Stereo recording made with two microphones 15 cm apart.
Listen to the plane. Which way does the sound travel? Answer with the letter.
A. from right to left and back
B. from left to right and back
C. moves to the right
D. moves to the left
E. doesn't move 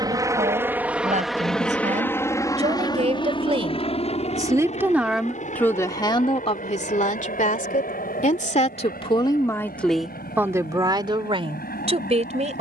D.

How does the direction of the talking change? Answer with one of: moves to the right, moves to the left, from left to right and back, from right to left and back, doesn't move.
from right to left and back.